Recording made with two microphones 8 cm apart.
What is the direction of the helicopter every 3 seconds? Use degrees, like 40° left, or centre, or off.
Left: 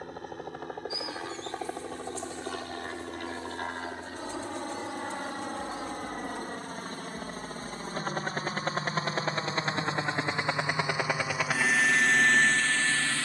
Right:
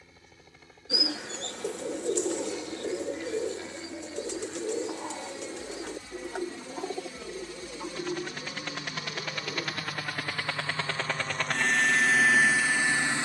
60° left, 60° left, 40° left, 20° left, 10° right.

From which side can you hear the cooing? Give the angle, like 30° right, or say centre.
80° right.